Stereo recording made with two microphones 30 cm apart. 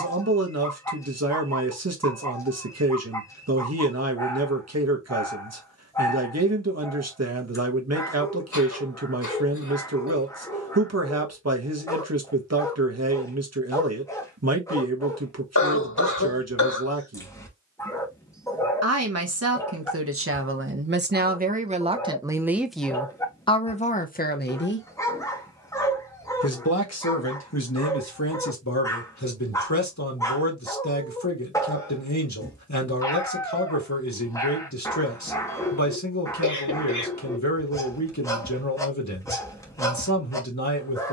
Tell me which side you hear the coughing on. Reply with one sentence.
You can hear the coughing on the left.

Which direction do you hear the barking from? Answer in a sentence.
You can hear the barking in the centre.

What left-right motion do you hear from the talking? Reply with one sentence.
You can hear the talking travel towards the left.